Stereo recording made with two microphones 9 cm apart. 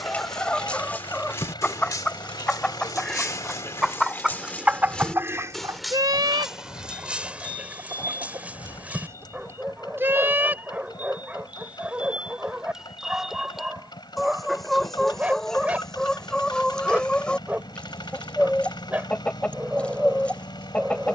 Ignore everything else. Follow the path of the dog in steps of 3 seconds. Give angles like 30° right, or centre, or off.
30° left, 20° left, 10° right, 20° right, 20° right, 20° right, 20° right.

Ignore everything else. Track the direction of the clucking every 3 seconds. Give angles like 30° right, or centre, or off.
10° left, 20° right, 50° right, 20° right, centre, 10° left, 10° left.